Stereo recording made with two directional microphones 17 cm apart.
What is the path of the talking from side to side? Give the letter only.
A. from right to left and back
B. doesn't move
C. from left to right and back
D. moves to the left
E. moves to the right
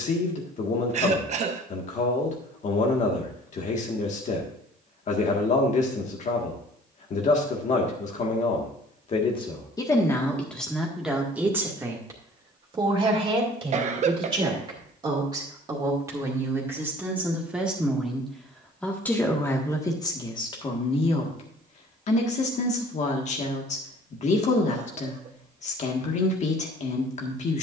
C.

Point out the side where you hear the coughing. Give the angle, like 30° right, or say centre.
40° right.